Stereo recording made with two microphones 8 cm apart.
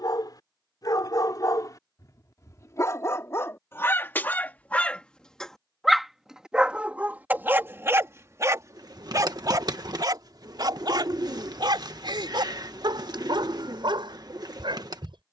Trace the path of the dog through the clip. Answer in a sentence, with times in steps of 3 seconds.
In this clip you hear the dog on the left from 0 s and on the right from 6 s.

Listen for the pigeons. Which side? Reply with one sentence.
You can hear the pigeons on the right.